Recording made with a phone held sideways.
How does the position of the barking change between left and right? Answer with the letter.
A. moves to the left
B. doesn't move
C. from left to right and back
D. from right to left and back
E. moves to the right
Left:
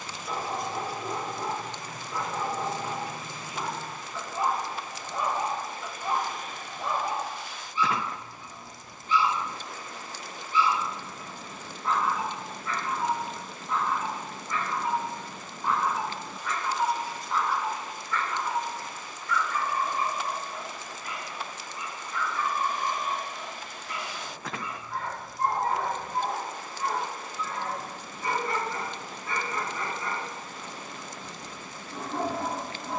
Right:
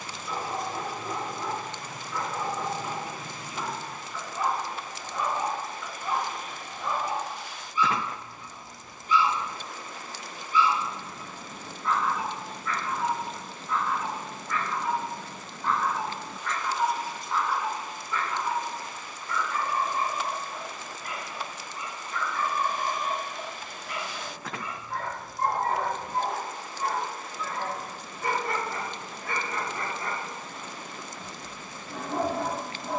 E.